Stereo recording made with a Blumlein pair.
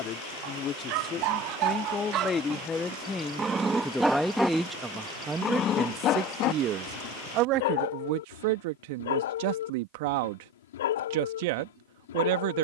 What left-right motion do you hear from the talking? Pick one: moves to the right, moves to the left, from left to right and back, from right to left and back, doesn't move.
moves to the right.